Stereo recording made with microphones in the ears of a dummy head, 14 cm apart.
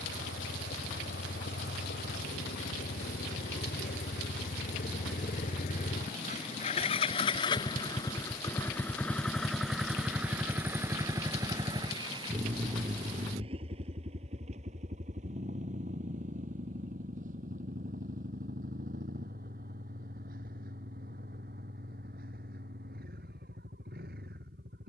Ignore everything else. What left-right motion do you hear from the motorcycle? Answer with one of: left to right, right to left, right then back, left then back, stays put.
left to right.